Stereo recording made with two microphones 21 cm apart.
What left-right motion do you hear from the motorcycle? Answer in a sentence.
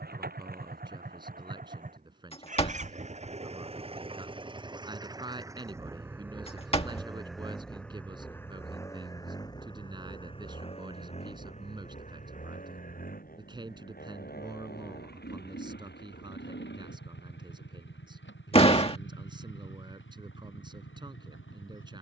You can hear the motorcycle go from the right side to the left.